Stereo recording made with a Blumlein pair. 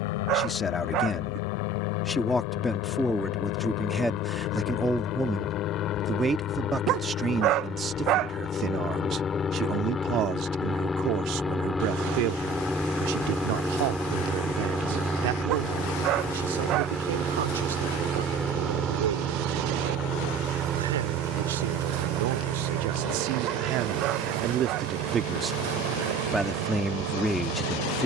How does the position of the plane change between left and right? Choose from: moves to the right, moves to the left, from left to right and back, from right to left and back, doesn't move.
moves to the right.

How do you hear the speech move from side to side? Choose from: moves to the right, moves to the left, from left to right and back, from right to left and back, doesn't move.
from left to right and back.